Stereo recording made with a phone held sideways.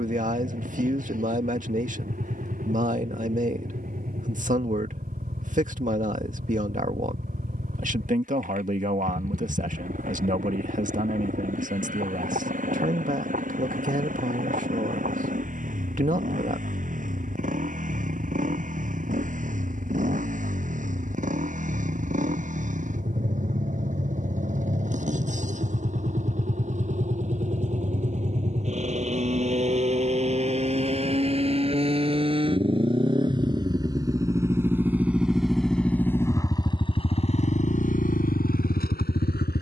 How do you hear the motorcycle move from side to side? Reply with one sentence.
You can hear the motorcycle move to the left.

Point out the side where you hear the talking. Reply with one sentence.
You can hear the talking on the right.